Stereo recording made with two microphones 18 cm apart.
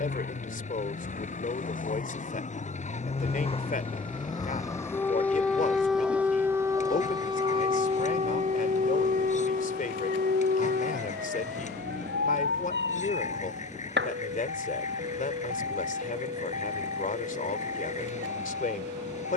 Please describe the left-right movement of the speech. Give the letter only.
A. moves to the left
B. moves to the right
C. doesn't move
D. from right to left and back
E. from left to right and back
C.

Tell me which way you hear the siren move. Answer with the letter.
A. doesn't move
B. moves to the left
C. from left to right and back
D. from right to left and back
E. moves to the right
E.